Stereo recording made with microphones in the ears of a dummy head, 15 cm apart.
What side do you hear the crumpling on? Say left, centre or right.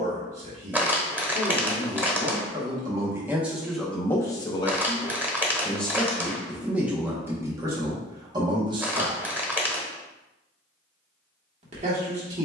centre.